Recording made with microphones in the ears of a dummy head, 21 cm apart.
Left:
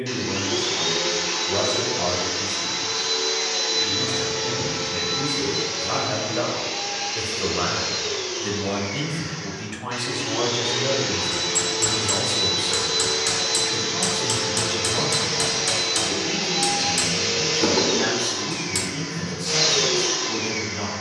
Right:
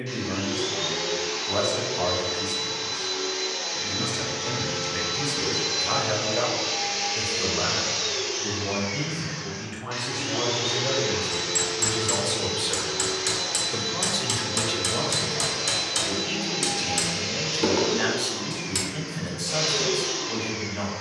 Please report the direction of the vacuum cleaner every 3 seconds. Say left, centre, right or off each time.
left, centre, right, centre, left, left, left.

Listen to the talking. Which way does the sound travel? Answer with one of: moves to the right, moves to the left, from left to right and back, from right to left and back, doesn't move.
from right to left and back.